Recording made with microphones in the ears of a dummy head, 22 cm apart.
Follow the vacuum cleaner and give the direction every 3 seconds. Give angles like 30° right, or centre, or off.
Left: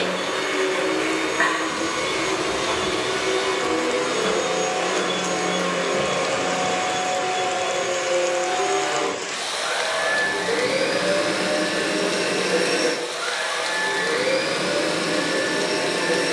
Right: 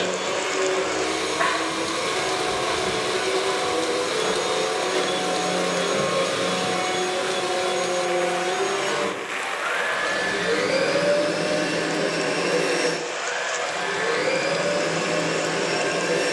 30° left, 10° left, 40° right, 20° right, 20° left, 20° left.